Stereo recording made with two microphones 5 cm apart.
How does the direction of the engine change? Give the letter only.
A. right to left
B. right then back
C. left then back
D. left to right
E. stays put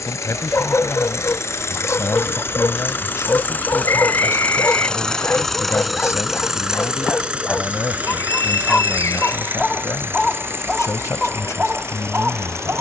D.